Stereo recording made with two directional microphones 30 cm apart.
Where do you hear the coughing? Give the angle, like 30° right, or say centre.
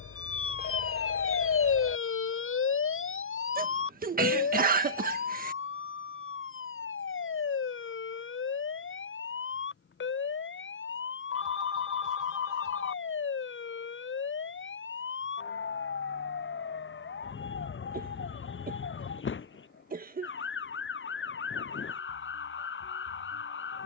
30° right.